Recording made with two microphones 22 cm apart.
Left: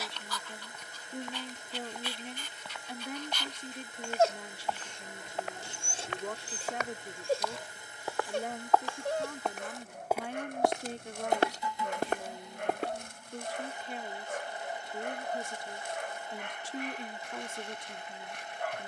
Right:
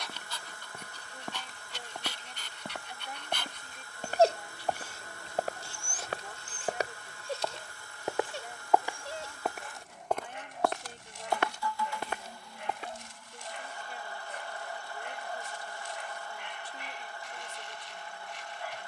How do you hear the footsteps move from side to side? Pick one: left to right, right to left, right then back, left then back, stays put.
right to left.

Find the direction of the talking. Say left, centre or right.
left.